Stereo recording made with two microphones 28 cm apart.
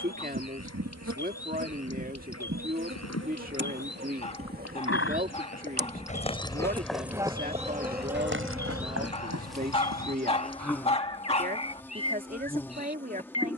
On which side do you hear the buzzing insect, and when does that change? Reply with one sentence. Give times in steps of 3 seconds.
In this clip you hear the buzzing insect on the right from 0 s and in the centre from 6 s.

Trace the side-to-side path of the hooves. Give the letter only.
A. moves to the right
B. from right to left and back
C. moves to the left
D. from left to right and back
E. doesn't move
A.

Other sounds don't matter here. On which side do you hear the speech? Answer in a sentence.
In this clip you hear the speech on the right.